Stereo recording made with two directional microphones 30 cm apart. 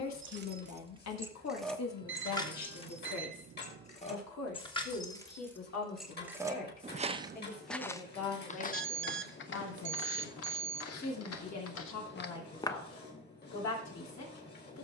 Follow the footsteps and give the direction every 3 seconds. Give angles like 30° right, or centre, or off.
off, off, 10° left, 50° left, 30° left.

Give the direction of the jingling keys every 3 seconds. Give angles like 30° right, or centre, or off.
centre, 20° left, 20° right, off, off.